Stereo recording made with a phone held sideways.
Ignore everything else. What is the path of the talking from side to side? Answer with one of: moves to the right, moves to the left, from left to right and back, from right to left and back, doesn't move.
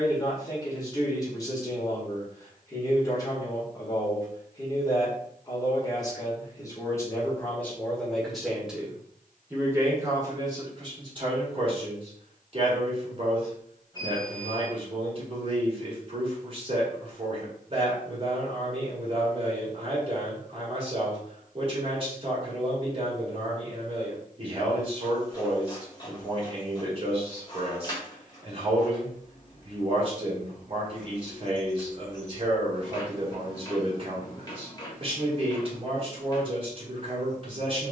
moves to the right.